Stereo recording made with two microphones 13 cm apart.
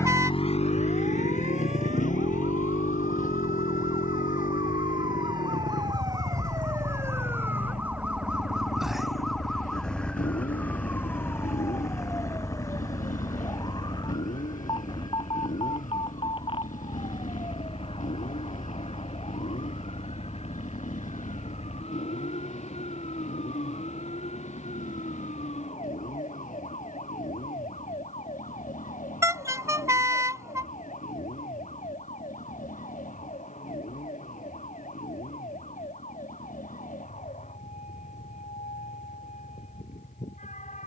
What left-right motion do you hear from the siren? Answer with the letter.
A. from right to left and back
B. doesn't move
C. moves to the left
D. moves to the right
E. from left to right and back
C.